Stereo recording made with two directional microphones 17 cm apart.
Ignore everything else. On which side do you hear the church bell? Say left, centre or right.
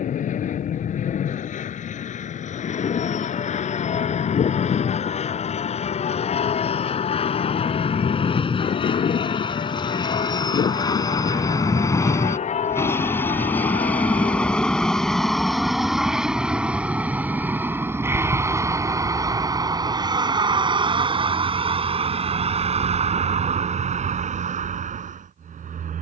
left.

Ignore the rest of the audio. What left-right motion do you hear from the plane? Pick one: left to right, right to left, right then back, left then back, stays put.
left to right.